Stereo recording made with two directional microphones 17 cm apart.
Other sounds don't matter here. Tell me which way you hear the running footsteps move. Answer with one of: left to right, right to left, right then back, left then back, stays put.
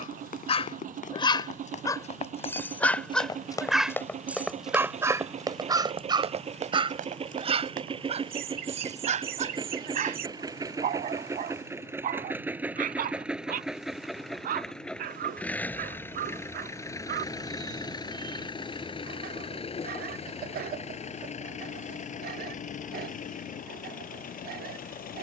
left to right.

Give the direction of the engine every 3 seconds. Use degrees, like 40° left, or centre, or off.
50° right, 40° right, 30° right, 20° right, centre, 20° left, 30° left, 50° left, 50° left.